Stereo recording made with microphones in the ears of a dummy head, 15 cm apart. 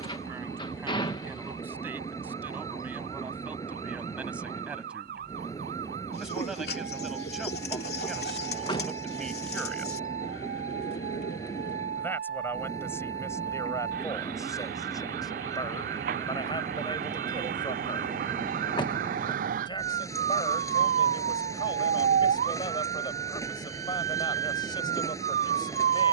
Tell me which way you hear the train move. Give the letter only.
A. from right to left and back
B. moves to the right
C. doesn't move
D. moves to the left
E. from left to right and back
C.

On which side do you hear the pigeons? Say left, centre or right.
left.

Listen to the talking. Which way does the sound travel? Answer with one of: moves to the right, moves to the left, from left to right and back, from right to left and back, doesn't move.
moves to the left.